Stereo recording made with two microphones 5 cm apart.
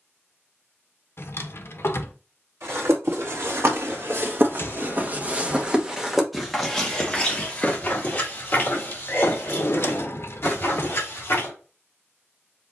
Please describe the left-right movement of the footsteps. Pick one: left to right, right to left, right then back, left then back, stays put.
right to left.